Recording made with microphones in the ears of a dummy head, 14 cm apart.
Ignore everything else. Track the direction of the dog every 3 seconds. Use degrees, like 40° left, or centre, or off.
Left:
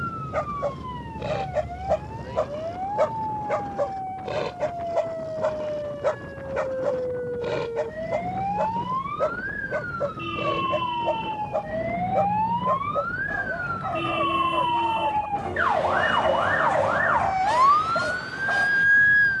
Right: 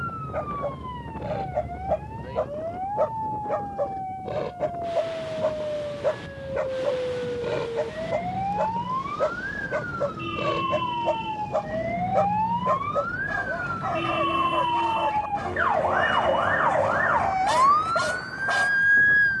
60° left, 40° left, 10° left, 20° right, 30° right, 30° right, 30° right.